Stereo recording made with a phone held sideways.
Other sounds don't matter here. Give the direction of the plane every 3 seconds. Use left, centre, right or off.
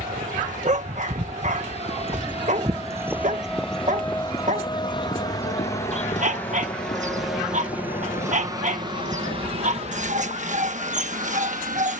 left, left, centre, right.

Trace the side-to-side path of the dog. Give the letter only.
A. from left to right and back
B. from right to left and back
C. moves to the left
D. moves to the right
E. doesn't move
E.